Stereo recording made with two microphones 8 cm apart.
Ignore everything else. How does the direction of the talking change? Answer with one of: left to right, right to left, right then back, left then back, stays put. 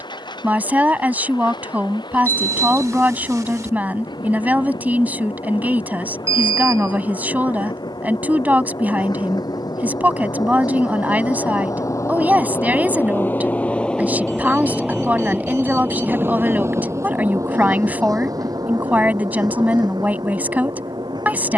stays put.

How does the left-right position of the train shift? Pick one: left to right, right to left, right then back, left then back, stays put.
left to right.